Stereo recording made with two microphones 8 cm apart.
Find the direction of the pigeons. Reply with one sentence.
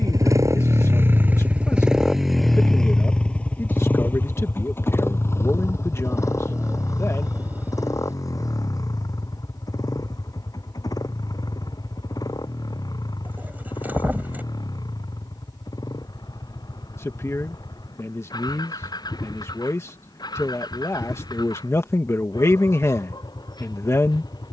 In this clip you hear the pigeons on the right.